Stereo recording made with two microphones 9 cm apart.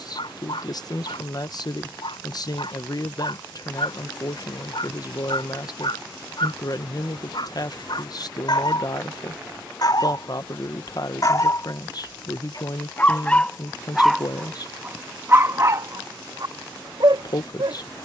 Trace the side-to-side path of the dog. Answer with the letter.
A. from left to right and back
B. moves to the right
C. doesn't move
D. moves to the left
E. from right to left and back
B.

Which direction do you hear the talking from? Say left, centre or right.
left.